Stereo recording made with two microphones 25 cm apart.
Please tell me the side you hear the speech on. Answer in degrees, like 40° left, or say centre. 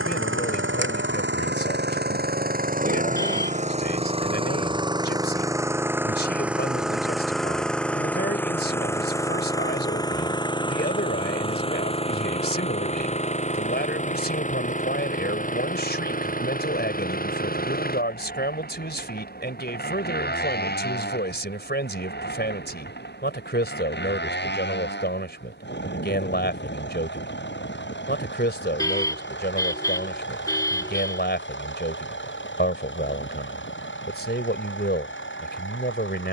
40° left.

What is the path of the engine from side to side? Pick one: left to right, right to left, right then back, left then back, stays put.
right to left.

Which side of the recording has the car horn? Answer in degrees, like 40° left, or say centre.
10° left.